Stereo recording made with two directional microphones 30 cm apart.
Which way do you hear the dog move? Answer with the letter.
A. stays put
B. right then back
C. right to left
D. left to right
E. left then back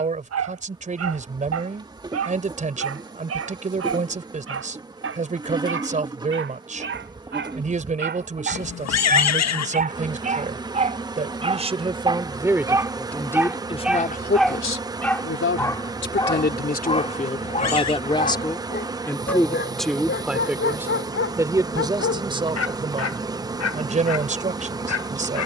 C.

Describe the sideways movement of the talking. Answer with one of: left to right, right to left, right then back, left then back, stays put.
left then back.